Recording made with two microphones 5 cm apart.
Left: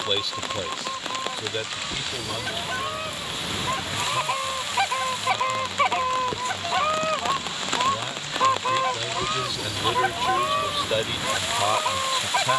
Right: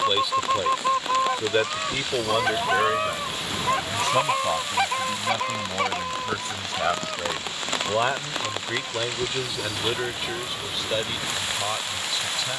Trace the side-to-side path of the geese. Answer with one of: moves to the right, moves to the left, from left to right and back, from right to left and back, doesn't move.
moves to the left.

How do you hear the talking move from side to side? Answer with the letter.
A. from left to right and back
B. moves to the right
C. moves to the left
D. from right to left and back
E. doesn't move
A.